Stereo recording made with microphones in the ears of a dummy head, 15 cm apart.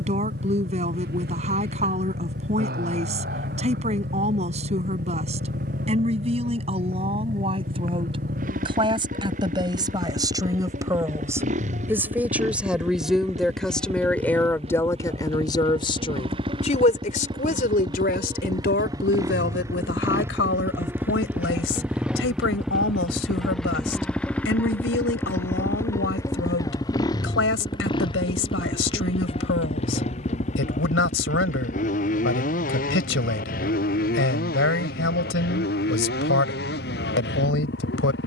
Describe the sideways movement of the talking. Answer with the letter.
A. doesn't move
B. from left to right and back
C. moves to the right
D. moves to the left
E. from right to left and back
D.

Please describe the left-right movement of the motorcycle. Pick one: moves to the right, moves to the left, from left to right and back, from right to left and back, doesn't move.
moves to the left.